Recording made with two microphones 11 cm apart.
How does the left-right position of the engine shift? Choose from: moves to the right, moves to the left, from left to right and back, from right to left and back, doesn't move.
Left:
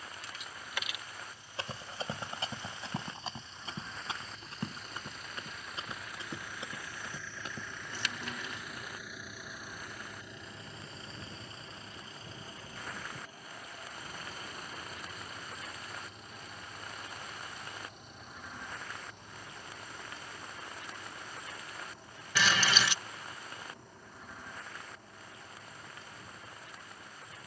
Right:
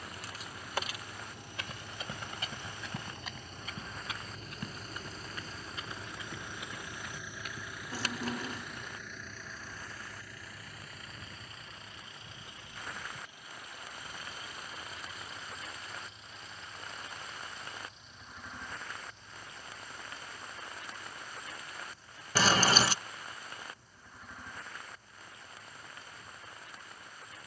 moves to the left.